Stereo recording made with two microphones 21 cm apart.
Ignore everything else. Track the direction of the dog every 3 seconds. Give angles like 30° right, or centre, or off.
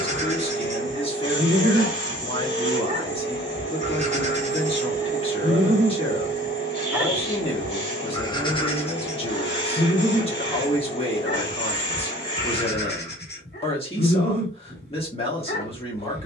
30° right, 30° right, 10° left, 40° left, 50° left, 50° left.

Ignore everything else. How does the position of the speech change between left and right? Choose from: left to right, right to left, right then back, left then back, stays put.
stays put.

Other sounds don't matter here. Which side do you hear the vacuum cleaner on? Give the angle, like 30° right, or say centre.
30° left.